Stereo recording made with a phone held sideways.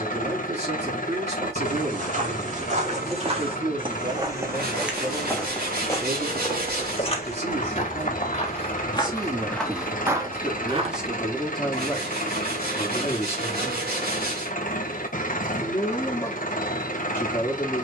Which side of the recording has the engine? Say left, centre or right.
left.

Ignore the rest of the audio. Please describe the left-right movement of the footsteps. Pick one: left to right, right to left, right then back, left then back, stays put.
left then back.